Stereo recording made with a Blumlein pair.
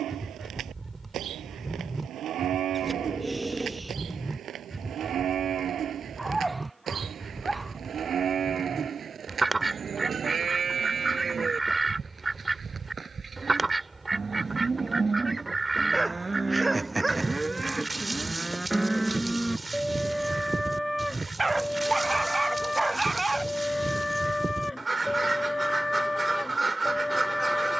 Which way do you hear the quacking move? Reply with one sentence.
You can hear the quacking stay in one place.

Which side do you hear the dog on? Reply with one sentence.
In this clip you hear the dog in the centre.